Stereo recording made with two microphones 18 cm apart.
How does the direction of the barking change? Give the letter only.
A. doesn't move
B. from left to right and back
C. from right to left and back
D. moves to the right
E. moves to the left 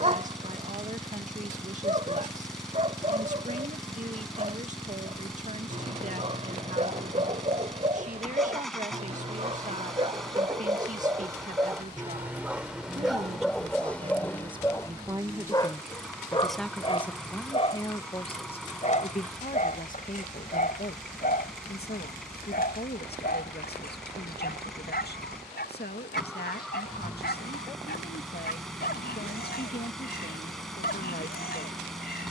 E.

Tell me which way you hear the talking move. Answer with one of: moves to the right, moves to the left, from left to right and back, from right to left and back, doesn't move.
moves to the left.